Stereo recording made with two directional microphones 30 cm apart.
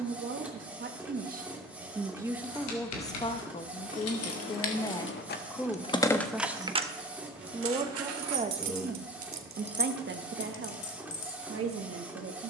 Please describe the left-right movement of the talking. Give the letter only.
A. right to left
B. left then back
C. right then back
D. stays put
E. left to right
B.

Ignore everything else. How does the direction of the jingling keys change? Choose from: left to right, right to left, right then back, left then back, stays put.
right then back.